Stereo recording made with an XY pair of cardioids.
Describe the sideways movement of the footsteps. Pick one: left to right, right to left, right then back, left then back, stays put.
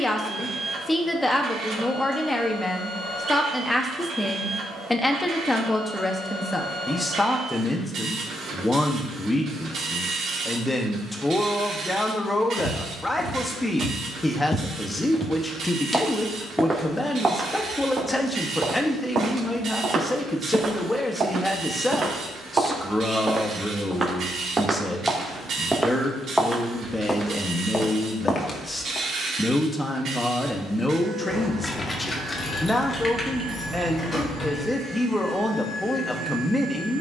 right then back.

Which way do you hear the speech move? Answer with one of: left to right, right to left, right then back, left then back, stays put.
stays put.